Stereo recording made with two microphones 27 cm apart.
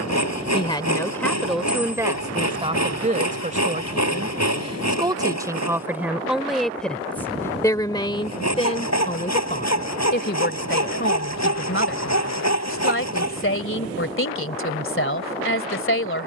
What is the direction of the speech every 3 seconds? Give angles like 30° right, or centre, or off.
centre, 20° right, 10° left, 40° left, 50° left, 50° left.